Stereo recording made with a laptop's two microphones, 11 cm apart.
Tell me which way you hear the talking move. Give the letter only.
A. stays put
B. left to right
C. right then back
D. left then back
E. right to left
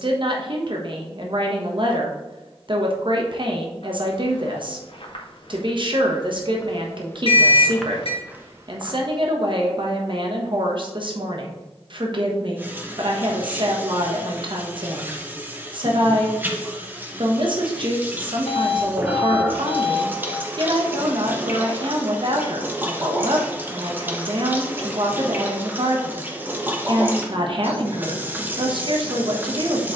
A.